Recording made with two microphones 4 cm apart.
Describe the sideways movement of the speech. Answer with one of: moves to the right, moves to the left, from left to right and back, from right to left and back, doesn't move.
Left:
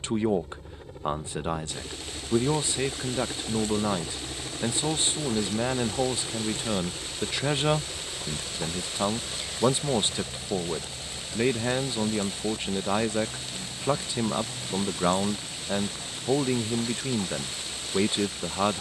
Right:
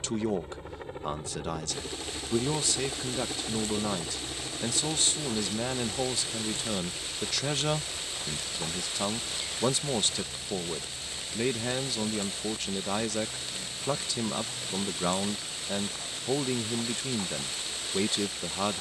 doesn't move.